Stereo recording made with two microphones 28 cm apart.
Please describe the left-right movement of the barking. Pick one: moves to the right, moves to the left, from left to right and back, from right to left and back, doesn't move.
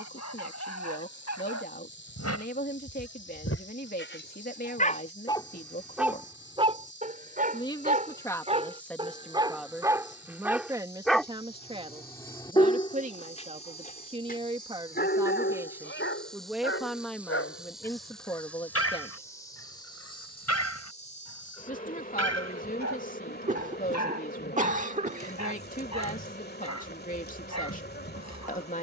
from left to right and back.